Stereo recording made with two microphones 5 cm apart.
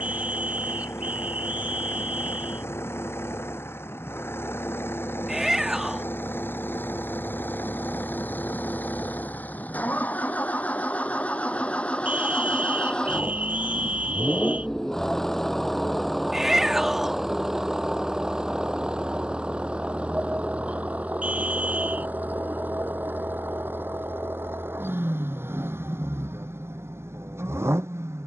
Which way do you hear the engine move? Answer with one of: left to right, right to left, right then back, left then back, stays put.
left to right.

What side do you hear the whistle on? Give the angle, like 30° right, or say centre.
30° right.